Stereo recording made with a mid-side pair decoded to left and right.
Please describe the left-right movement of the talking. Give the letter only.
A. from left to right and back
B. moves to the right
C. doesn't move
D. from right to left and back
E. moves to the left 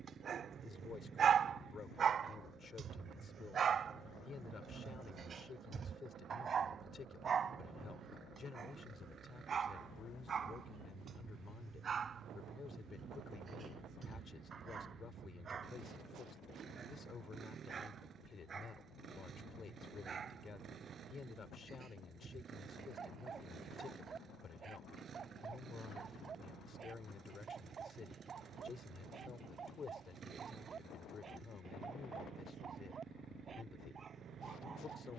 C.